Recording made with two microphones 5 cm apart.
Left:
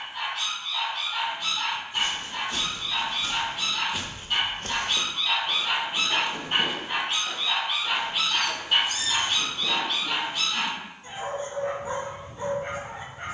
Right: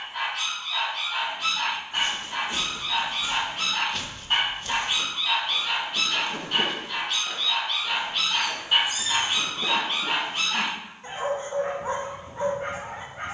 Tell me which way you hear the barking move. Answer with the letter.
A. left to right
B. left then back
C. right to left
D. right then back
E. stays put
B.